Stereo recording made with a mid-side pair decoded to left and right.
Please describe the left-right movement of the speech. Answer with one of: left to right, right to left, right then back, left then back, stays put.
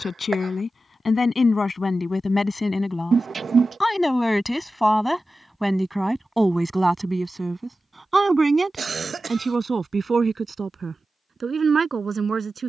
left to right.